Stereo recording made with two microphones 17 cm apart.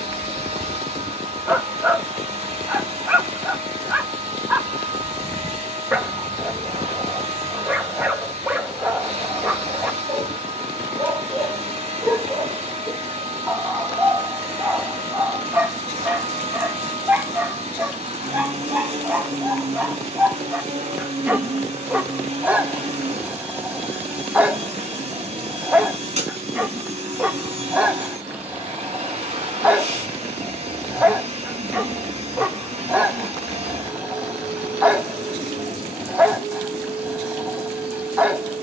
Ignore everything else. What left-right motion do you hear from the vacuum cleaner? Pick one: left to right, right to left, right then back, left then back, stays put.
stays put.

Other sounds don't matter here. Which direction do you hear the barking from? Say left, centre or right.
centre.